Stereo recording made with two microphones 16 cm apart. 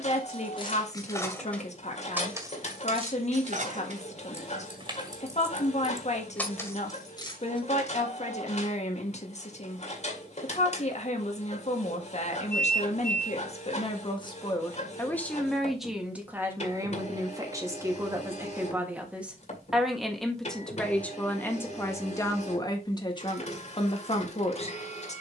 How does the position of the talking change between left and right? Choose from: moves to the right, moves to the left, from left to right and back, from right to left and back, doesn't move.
from left to right and back.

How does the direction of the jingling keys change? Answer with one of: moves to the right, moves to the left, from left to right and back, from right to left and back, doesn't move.
from left to right and back.